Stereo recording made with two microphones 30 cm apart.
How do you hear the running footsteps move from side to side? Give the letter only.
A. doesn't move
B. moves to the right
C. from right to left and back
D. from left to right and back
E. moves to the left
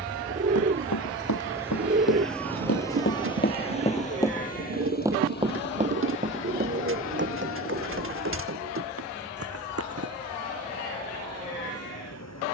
B.